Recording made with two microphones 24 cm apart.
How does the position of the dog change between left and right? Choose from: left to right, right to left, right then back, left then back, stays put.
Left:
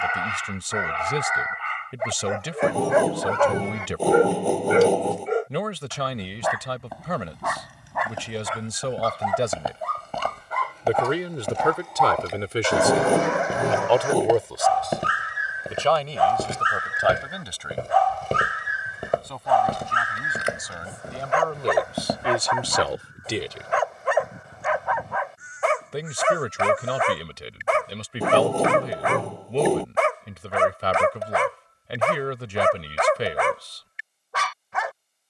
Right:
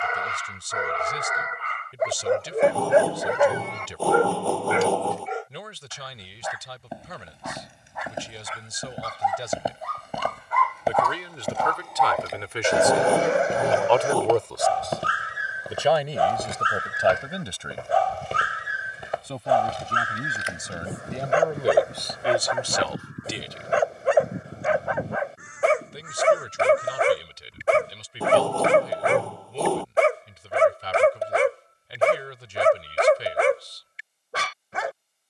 left then back.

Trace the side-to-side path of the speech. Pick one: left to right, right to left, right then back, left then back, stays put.
right then back.